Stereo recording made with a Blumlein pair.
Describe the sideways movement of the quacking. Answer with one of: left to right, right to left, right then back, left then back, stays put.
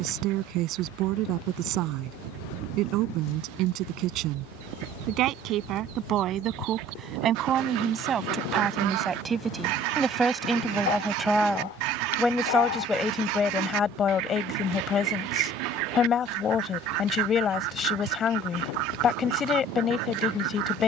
stays put.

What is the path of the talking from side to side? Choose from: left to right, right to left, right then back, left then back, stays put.
right to left.